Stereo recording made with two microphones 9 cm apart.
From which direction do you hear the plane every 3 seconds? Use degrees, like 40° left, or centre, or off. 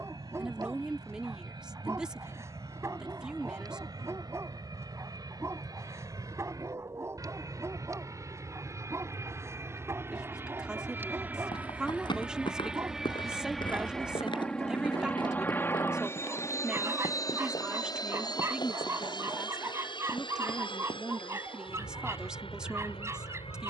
50° right, 50° right, 40° right, 30° right, centre, 30° left, 50° left, 70° left.